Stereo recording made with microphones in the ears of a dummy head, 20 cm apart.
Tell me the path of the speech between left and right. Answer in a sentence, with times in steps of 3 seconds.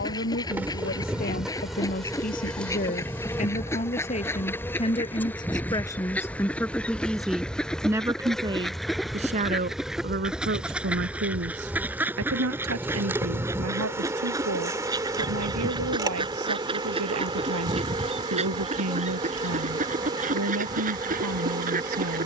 You can hear the speech on the left from 0 s, in the centre from 6 s and on the right from 9 s.